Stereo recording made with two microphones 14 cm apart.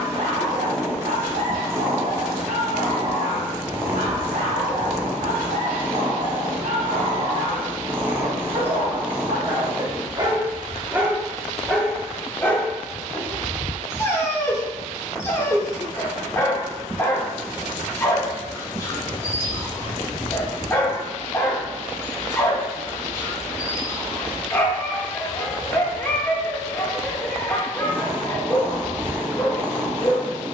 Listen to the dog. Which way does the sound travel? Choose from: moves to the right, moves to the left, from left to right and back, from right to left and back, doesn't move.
moves to the left.